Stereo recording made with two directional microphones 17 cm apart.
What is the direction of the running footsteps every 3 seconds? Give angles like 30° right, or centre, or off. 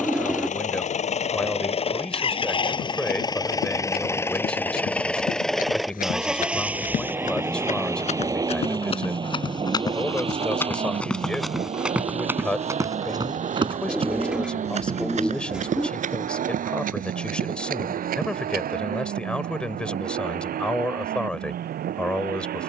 off, 60° left, 50° left, 10° left, 20° right, 50° right, 60° right, off.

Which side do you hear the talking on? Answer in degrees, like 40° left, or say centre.
10° left.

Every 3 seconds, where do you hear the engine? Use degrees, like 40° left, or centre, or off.
40° left, 10° left, 10° right, 30° right, 40° right, 50° right, 60° right, 60° right.